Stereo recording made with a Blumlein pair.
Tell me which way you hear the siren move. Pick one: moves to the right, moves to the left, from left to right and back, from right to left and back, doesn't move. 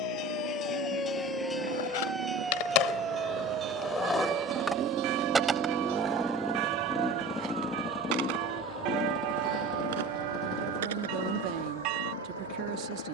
moves to the right.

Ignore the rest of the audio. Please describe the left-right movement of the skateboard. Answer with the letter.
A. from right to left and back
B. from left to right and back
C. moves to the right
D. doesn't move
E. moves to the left
C.